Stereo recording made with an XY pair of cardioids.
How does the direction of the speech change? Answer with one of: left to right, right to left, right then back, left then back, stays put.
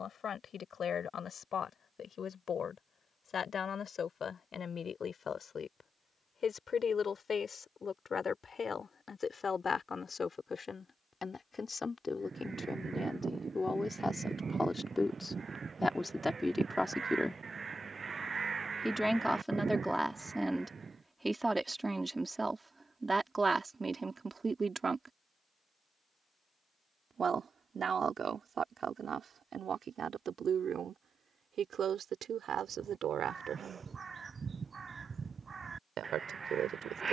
left to right.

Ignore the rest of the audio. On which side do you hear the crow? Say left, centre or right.
right.